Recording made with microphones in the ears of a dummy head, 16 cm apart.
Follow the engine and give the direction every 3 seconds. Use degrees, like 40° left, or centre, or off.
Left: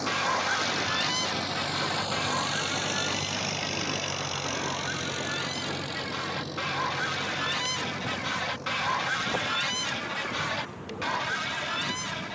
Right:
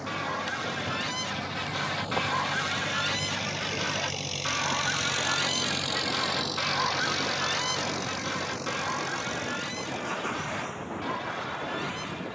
50° left, 10° right, 50° right, 60° right.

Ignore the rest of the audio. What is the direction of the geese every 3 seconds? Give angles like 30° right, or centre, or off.
10° left, 30° right, 10° left, 50° left.